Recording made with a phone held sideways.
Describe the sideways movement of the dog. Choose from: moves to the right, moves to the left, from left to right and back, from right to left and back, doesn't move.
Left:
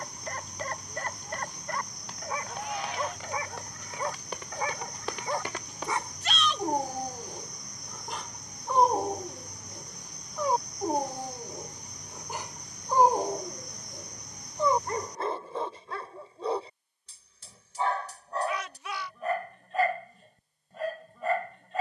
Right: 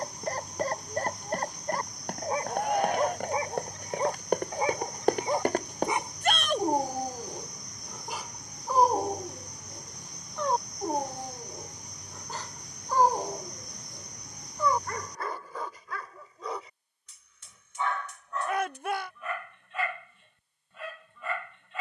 moves to the left.